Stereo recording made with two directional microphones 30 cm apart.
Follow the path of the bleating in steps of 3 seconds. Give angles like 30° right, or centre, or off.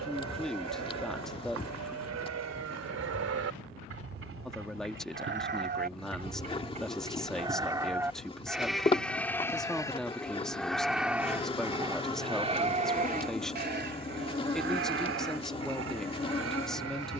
60° right, 40° right, 10° right, centre, 30° right, 50° right.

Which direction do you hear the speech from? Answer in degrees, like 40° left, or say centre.
centre.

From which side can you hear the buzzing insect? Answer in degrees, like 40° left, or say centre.
20° left.